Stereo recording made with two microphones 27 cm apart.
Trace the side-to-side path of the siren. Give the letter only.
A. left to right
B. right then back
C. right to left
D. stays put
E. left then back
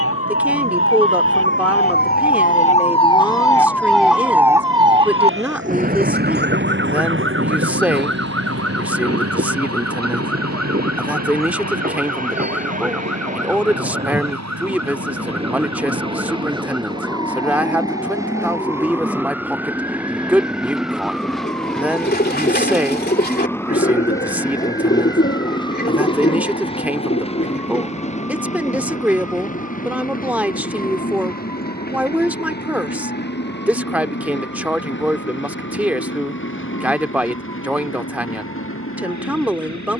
A.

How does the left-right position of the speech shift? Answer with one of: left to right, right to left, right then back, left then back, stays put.
stays put.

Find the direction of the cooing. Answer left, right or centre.
left.